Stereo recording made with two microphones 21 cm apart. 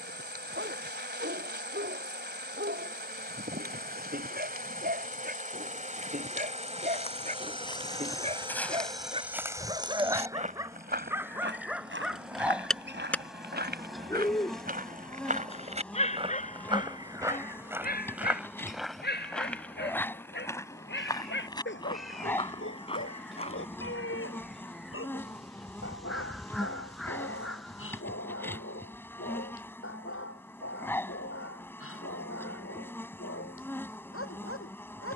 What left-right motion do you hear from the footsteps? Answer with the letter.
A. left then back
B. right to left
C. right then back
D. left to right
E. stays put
C.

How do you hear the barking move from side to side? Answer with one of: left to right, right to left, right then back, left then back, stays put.
right to left.